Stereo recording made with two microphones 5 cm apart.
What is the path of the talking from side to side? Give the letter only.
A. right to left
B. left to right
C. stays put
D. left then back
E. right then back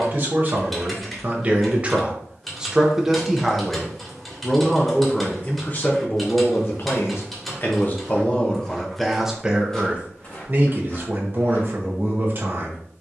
D.